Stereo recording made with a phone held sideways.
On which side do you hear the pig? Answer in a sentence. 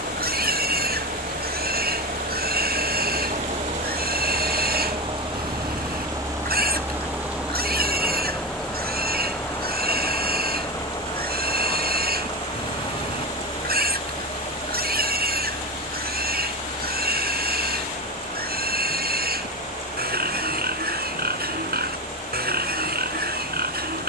In this clip you hear the pig on the right.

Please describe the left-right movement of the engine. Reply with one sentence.
In this clip you hear the engine go from the right side to the left.